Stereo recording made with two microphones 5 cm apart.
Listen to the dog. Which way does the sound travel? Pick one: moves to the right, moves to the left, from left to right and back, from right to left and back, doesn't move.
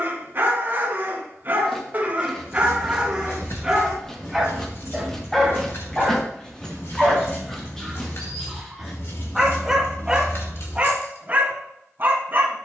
from right to left and back.